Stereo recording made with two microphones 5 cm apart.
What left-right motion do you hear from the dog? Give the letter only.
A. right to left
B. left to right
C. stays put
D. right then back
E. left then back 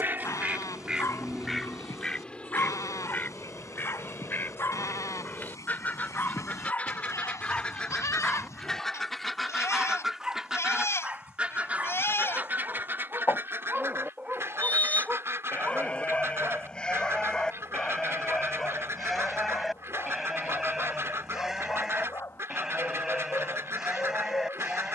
D.